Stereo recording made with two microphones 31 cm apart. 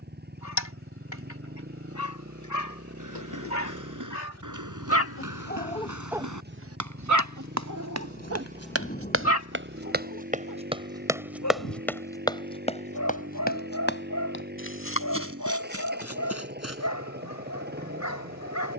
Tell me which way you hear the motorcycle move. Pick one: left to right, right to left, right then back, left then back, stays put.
stays put.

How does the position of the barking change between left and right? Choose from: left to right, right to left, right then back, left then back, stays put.
right then back.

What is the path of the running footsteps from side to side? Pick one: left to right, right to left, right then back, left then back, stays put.
right to left.